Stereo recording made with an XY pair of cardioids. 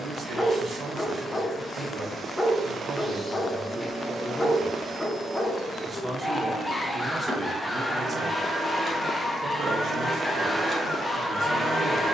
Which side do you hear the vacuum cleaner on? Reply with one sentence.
In this clip you hear the vacuum cleaner in the centre.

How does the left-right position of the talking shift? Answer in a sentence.
You can hear the talking move from right to left and back again.